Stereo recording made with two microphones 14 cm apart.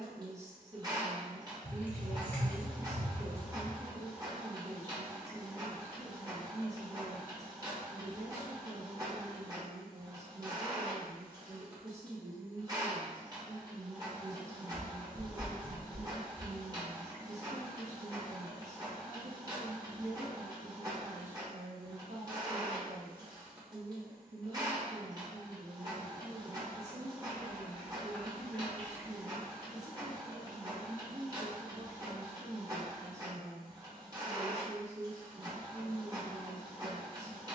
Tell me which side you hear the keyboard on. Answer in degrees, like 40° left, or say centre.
10° left.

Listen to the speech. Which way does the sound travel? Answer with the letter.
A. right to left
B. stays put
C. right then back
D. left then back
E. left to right
B.